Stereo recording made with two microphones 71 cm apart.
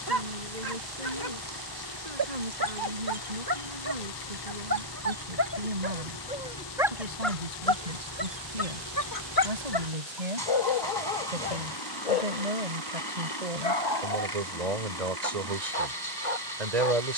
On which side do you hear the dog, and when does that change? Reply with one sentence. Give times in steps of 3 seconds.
In this clip you hear the dog on the right from 0 s, in the centre from 6 s and on the left from 9 s.